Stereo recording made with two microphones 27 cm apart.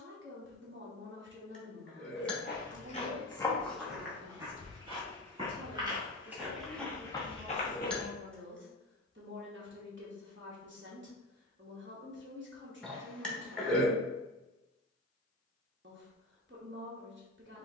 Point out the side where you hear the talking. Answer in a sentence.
In this clip you hear the talking on the right.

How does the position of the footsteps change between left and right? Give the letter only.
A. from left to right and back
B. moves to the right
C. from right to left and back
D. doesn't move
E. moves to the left
A.